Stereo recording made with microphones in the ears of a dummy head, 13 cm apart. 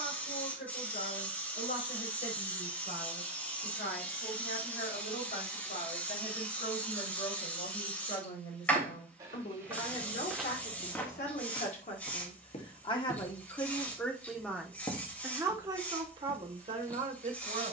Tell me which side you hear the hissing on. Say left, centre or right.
centre.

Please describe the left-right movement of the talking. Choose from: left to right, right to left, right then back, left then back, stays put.
left to right.